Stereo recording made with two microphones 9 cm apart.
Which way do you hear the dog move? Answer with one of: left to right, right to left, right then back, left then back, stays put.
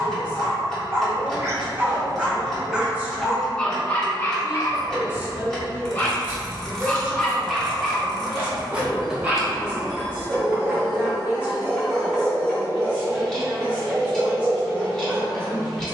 left then back.